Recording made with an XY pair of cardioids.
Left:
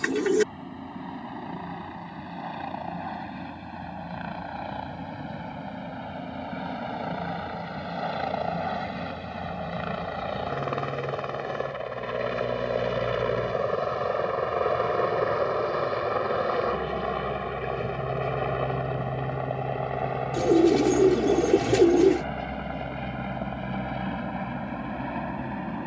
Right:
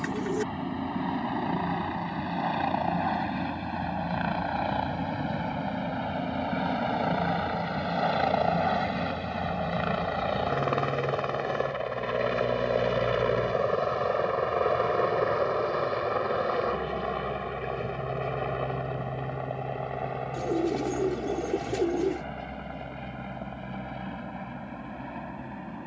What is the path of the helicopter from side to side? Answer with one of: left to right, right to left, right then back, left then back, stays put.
right to left.